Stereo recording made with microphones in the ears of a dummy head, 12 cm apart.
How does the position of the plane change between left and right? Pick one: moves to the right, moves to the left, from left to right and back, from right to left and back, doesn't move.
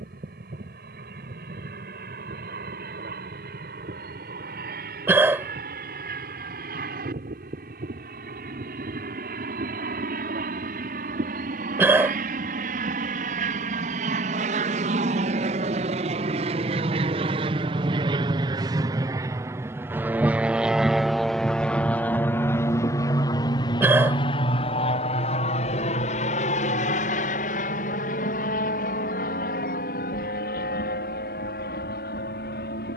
moves to the left.